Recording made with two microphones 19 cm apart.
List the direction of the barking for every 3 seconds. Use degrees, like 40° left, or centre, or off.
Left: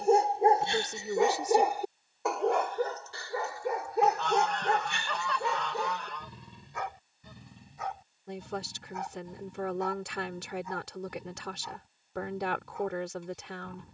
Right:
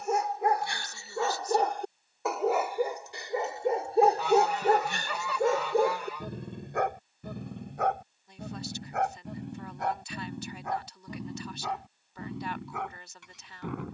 10° left, 40° right, 60° right, 70° right, 80° right.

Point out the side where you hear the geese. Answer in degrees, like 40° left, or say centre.
10° right.